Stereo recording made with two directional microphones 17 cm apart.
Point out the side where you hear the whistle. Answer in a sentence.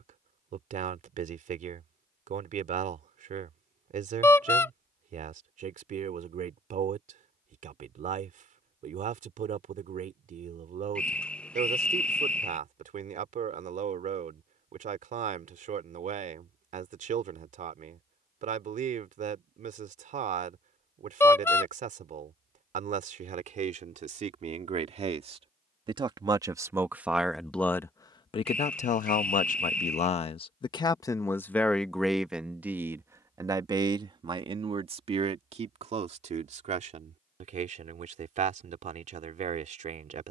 In this clip you hear the whistle in the centre.